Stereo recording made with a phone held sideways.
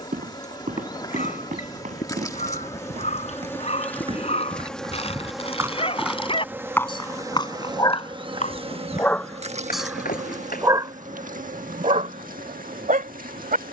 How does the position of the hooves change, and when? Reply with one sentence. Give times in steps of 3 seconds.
In this clip you hear the hooves on the right from 0 s, on the left from 6 s and not at all from 12 s.